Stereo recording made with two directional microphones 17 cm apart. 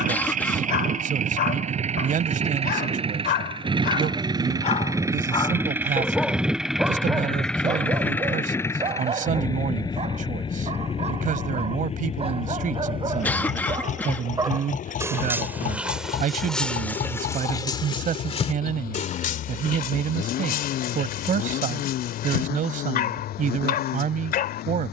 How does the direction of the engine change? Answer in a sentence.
In this clip you hear the engine travel towards the left.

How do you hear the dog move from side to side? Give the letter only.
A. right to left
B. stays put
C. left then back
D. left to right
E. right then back
E.